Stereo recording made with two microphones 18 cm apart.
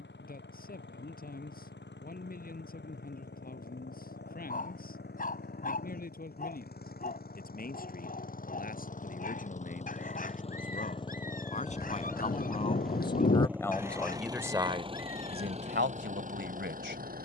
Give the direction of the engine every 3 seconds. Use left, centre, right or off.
left, left, left, left, centre, right.